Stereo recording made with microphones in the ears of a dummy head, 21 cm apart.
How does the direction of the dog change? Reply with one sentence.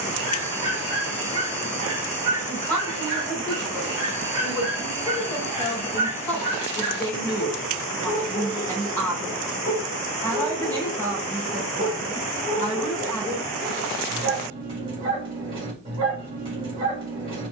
In this clip you hear the dog stay put.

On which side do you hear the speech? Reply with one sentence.
You can hear the speech in the centre.